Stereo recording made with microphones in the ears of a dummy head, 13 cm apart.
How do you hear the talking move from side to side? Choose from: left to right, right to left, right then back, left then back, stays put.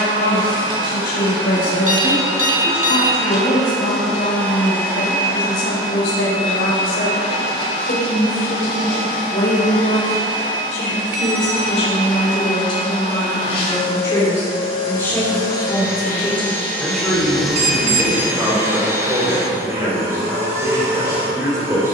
left to right.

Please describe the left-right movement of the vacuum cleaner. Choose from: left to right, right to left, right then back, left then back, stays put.
left then back.